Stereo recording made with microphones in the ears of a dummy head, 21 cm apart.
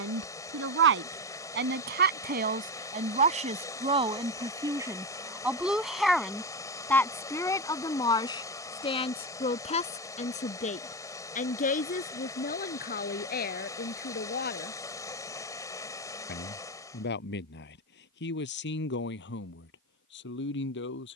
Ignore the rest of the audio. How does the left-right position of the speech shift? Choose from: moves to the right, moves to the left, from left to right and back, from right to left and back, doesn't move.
moves to the left.